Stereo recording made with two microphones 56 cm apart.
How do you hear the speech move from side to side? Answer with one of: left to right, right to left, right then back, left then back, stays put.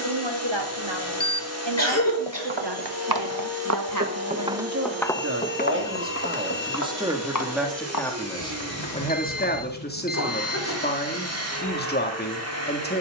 right to left.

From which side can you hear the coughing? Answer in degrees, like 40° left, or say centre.
30° left.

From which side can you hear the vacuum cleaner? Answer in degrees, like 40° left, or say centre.
30° right.